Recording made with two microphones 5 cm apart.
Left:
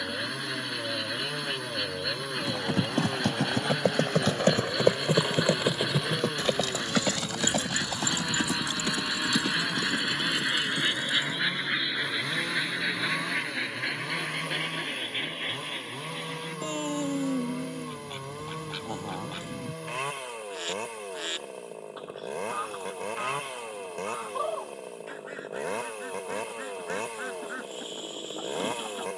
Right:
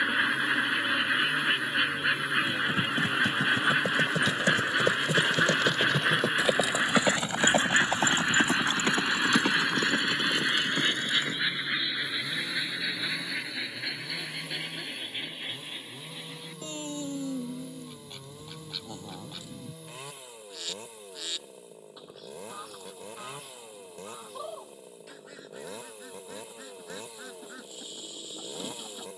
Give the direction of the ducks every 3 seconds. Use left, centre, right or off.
right, right, right, centre, left, left, left, left, left, left.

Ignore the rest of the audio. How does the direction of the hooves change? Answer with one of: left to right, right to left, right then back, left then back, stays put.
left to right.